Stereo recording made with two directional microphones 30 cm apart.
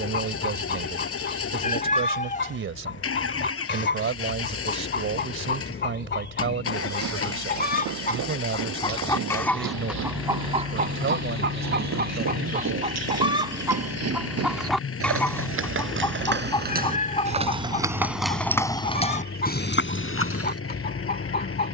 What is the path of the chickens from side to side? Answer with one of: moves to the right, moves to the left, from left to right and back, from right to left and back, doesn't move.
from left to right and back.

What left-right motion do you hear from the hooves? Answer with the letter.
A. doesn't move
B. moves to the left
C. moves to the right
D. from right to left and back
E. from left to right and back
B.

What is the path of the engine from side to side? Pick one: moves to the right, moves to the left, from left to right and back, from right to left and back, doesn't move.
doesn't move.